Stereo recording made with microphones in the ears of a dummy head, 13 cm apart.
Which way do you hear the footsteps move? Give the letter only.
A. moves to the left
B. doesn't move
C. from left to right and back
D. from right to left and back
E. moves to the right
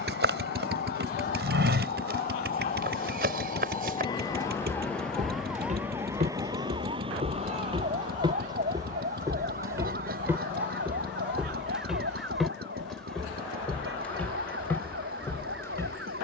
A.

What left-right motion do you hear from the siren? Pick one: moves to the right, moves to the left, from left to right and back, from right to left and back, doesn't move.
moves to the right.